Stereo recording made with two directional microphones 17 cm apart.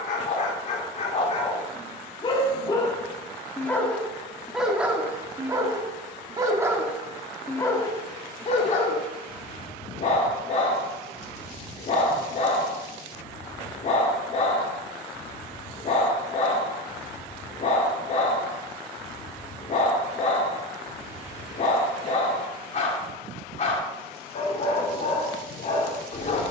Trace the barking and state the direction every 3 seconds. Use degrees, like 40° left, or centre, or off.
40° left, centre, 10° left, 40° left, 40° left, 40° left, 40° left, 40° left, 40° left.